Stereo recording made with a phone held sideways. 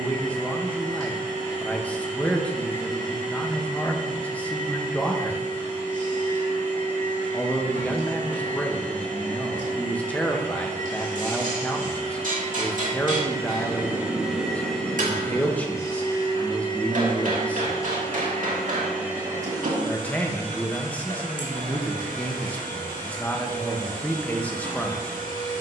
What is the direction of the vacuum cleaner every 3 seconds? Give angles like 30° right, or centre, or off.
70° right, 70° right, 70° right, 60° right, 20° right, 30° left, 20° right, 70° right, 70° right.